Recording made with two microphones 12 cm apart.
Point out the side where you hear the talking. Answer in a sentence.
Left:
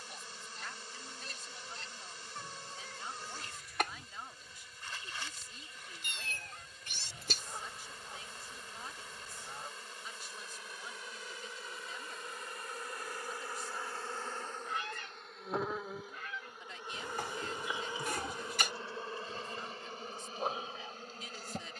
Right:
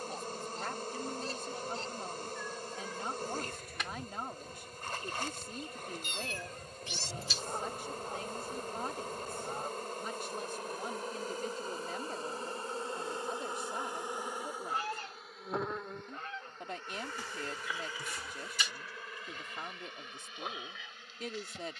In this clip you hear the talking on the right.